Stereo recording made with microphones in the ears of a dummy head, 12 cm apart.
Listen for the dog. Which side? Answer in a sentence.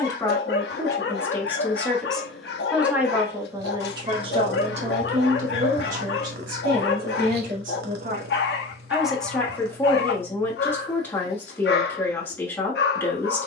You can hear the dog on the left.